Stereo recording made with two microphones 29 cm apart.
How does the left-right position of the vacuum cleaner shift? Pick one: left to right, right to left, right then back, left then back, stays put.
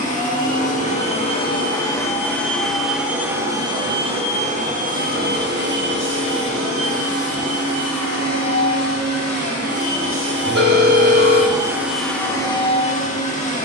right then back.